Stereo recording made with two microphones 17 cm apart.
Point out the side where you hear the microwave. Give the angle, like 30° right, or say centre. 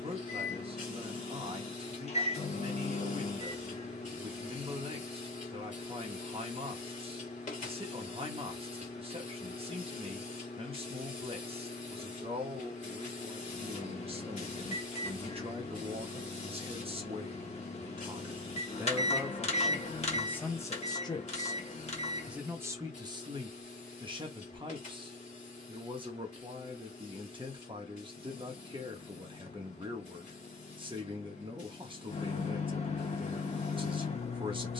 40° left.